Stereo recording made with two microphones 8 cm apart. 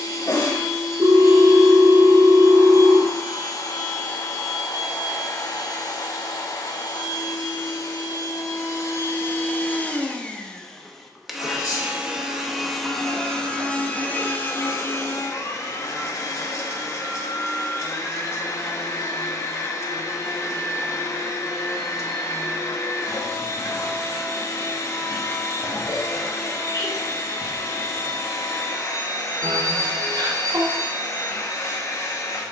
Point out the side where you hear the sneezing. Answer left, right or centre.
left.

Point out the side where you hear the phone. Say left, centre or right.
right.